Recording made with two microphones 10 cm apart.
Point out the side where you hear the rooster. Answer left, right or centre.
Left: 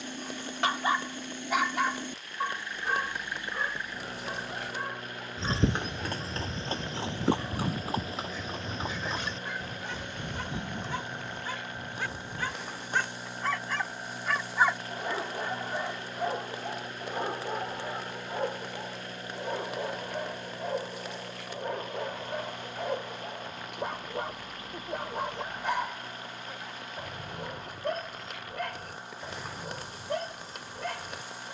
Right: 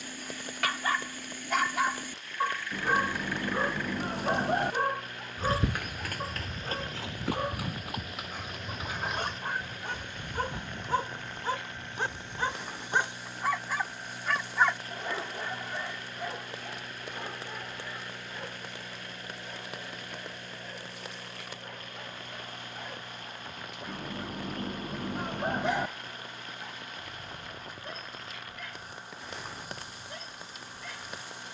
right.